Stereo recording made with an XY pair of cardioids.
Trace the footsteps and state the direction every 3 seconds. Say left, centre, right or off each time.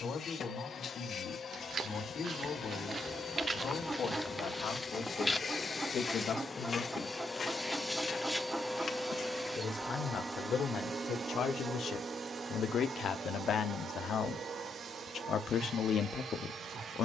right, centre, left, left, off, off.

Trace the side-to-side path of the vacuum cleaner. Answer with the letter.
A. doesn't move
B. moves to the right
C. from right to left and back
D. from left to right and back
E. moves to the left
B.